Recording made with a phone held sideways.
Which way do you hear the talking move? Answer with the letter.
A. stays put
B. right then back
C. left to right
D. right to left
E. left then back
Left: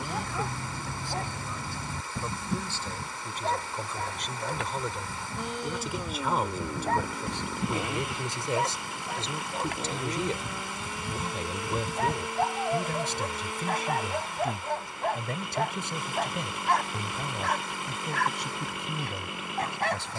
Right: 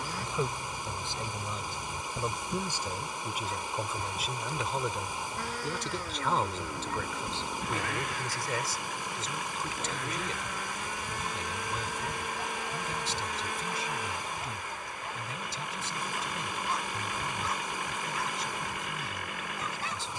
D.